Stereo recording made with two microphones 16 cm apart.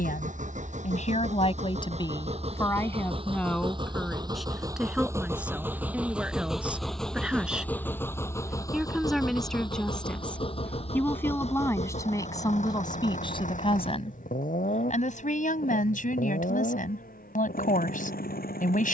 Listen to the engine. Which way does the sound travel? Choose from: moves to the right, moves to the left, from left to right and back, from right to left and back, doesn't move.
moves to the left.